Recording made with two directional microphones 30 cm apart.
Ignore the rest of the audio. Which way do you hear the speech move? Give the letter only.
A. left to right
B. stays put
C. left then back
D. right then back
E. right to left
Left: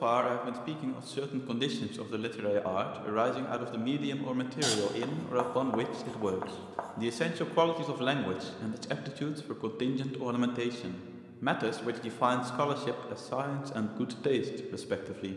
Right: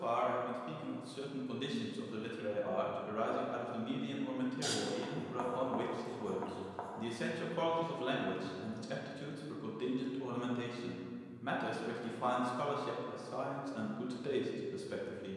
B.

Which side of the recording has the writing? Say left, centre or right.
left.